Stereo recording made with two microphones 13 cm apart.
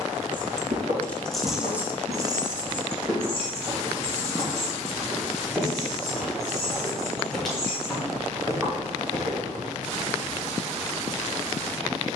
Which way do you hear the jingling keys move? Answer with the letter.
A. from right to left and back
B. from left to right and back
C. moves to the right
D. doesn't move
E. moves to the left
C.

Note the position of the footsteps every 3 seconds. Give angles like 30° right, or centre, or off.
50° right, 20° right, centre, 40° right.